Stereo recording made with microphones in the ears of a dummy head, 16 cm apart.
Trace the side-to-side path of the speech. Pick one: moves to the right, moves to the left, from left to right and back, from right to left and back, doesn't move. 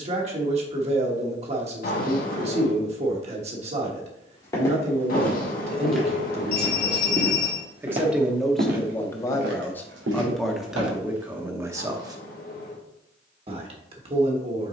from right to left and back.